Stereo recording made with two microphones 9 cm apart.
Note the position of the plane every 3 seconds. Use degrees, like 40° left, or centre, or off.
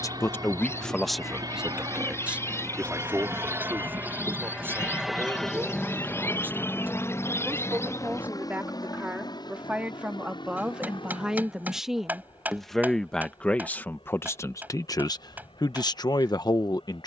50° right, 10° right, 30° left, 60° left, 70° left, 70° left.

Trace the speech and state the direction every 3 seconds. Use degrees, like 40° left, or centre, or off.
centre, 20° right, 20° right, 10° right, 20° left, 50° left.